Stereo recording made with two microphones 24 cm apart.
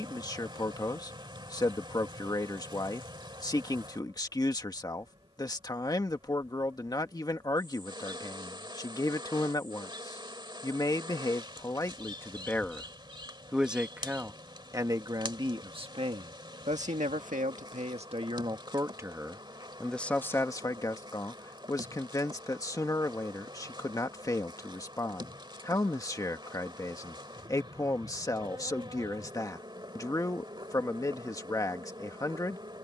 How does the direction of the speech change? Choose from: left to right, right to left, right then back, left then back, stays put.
right then back.